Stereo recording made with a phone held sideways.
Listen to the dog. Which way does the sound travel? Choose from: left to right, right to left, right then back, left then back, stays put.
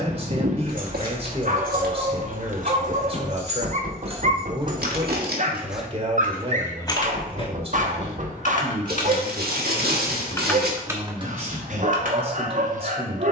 stays put.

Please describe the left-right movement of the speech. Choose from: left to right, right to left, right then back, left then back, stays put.
stays put.